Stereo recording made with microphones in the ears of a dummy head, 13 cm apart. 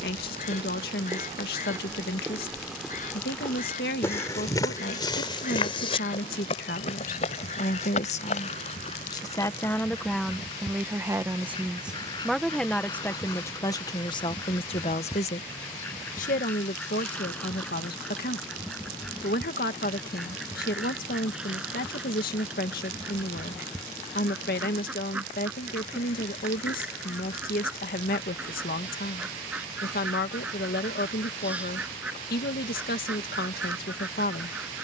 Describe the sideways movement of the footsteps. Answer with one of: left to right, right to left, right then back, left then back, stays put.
right to left.